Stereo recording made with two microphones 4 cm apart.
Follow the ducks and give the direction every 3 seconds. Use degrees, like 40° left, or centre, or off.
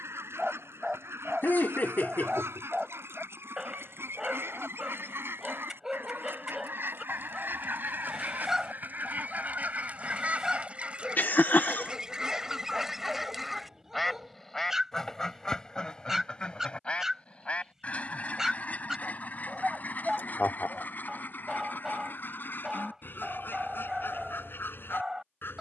70° right, 70° right, 50° right, 30° right, 10° right, 20° left, 40° left, 50° left, 50° left.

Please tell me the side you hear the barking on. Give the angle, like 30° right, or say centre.
10° right.